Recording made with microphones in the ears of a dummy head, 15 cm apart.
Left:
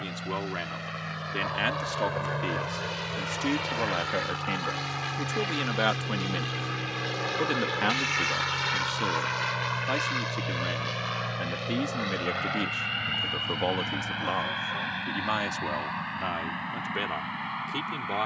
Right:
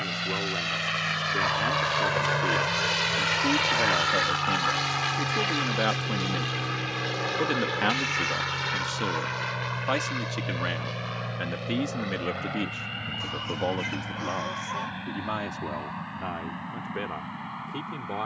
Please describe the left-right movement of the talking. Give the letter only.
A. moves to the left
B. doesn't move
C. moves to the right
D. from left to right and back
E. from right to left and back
D.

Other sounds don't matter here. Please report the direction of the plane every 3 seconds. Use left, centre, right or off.
right, right, centre, left, left, left.